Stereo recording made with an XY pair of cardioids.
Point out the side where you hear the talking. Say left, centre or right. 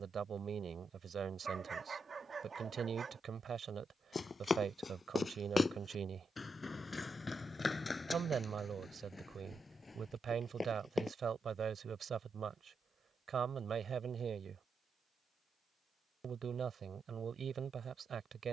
right.